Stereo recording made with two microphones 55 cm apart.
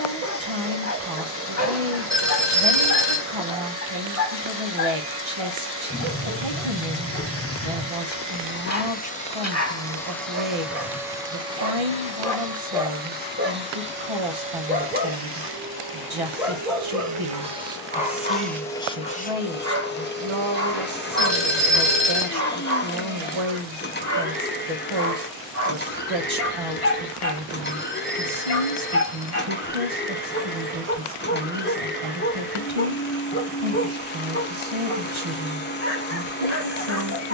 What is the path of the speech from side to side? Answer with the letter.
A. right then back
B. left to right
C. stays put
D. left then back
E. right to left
C.